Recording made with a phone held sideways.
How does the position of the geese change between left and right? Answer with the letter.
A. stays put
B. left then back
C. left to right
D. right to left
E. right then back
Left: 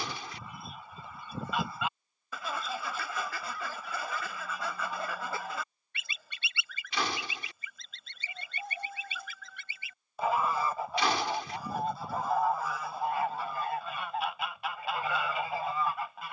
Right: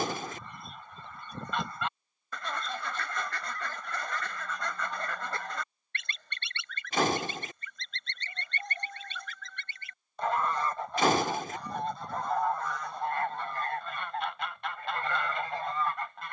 A.